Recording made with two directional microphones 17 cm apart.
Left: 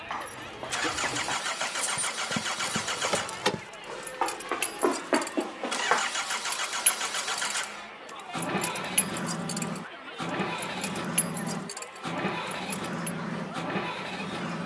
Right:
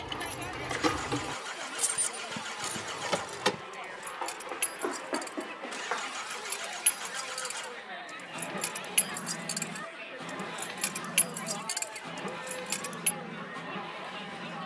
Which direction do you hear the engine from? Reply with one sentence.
In this clip you hear the engine on the left.